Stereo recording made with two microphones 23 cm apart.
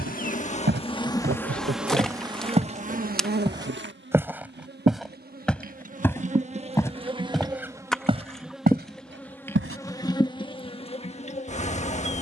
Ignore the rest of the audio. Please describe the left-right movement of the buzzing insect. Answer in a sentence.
You can hear the buzzing insect move from left to right and back again.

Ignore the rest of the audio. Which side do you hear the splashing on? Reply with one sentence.
In this clip you hear the splashing in the centre.